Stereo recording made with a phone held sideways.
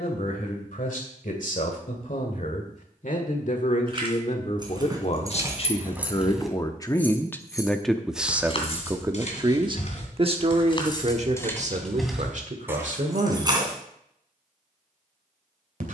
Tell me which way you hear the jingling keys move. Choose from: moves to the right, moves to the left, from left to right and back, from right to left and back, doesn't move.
from right to left and back.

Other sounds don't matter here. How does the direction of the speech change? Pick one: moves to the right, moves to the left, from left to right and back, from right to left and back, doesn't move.
moves to the right.